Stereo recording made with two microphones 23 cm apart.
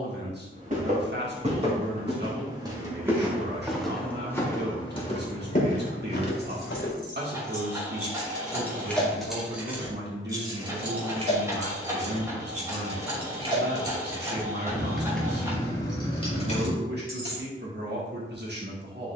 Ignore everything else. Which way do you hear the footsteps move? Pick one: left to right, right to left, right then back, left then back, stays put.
right to left.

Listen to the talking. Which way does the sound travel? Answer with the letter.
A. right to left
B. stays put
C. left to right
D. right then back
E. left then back
B.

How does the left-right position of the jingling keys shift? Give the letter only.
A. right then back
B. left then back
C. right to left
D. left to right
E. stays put
A.